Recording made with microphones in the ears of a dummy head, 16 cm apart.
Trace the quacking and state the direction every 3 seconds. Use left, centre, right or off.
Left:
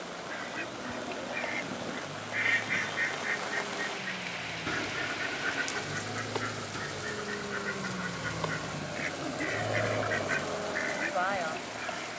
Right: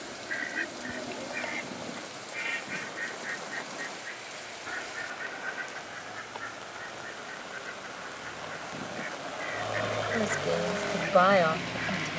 centre, left, left, left.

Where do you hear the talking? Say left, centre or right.
right.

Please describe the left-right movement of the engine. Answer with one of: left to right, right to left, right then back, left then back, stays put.
left to right.